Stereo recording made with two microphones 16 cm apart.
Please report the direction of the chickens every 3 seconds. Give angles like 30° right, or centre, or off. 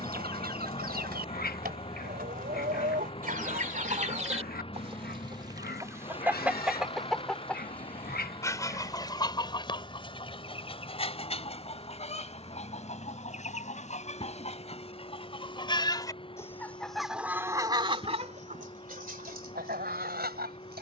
70° right, 40° right, 10° left, 40° left, 40° left, 10° left, 70° right.